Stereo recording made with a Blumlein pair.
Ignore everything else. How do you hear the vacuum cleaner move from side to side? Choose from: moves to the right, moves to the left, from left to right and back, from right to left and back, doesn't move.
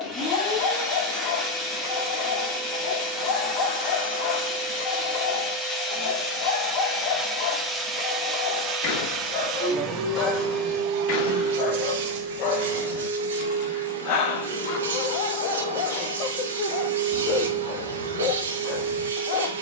moves to the right.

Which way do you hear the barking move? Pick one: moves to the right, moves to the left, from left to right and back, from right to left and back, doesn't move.
doesn't move.